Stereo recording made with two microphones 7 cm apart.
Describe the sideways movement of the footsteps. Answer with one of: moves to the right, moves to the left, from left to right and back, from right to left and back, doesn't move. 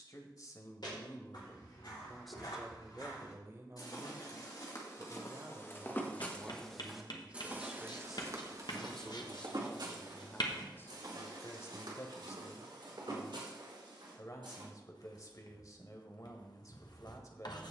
moves to the right.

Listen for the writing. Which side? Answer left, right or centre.
left.